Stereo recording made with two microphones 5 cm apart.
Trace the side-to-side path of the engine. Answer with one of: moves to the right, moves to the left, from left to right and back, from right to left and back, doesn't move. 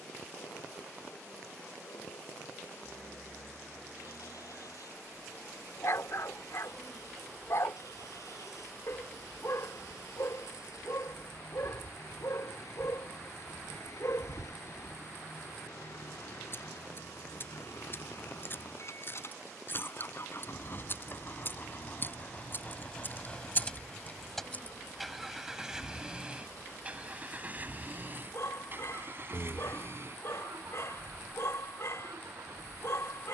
moves to the right.